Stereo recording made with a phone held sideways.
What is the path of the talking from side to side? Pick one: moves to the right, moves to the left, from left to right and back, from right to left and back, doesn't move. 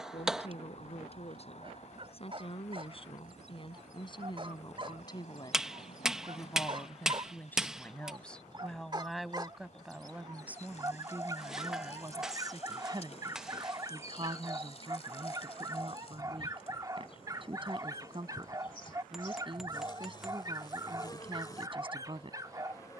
moves to the right.